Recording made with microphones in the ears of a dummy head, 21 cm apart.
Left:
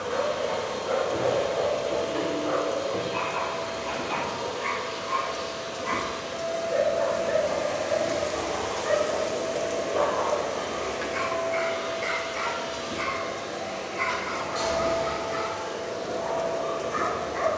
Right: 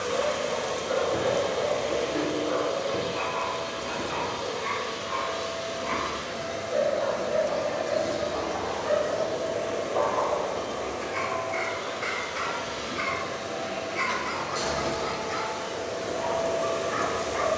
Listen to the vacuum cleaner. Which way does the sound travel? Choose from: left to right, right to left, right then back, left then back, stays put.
left then back.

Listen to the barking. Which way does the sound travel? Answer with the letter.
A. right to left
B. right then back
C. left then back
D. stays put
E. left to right
E.